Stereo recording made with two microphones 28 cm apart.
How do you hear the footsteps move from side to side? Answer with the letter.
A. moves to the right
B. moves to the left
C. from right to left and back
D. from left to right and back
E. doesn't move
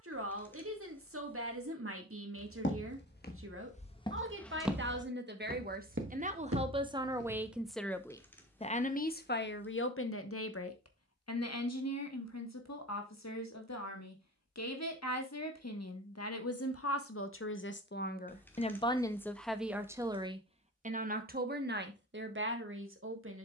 A.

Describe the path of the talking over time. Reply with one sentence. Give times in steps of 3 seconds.
You can hear the talking on the right from 0 s, in the centre from 6 s, on the left from 9 s, in the centre from 18 s and on the right from 21 s.